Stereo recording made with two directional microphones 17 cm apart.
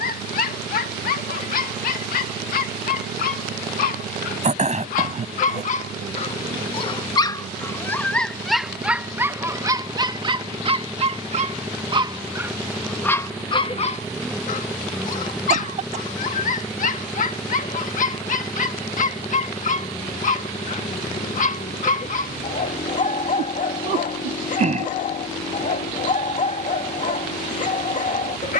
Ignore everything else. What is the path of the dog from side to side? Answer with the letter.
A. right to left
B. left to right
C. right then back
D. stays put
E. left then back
C.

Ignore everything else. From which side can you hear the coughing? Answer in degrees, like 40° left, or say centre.
40° right.